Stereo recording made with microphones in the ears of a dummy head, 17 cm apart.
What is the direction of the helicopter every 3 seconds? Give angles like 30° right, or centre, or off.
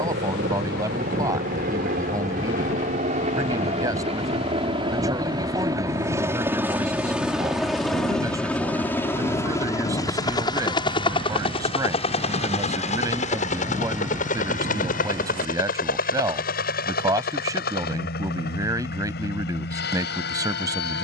50° right, 30° right, centre, 20° left, 40° left, 50° left, 60° left.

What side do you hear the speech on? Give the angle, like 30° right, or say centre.
20° right.